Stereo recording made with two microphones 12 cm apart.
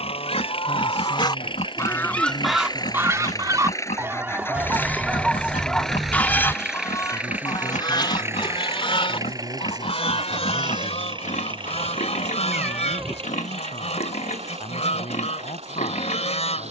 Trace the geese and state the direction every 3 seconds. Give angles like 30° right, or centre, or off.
30° left, 10° right, 30° left, 60° left, 60° left, 60° left.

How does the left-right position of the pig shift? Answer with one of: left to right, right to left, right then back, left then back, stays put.
stays put.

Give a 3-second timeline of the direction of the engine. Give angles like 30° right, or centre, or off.
40° left, 20° left, 10° right, 40° right, 50° right, 60° right.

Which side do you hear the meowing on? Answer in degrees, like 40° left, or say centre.
10° right.